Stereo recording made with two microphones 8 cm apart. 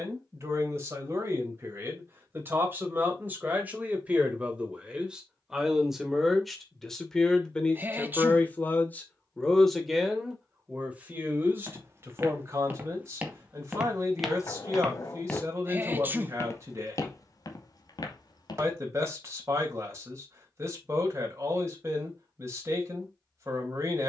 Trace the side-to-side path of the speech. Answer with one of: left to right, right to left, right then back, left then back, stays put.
left then back.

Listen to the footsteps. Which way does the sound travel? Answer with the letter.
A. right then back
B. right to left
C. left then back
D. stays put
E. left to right
B.